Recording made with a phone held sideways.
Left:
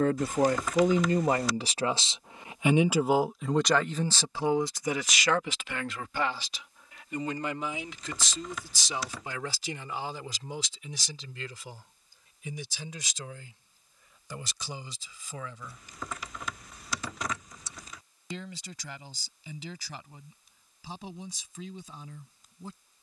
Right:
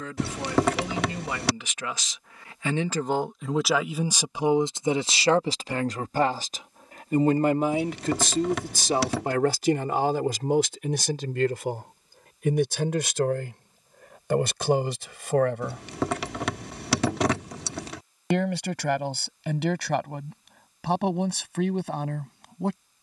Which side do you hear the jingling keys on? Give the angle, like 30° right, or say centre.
80° right.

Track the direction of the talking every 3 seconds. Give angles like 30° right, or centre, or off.
40° left, 20° right, 50° right, 60° right, 70° right, 70° right, 70° right, 80° right.